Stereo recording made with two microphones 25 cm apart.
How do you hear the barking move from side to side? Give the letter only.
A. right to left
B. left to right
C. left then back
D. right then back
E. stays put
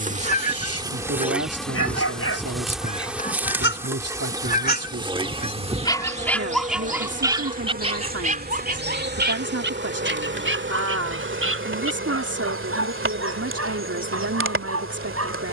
B.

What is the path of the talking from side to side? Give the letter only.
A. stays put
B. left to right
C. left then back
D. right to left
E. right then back
A.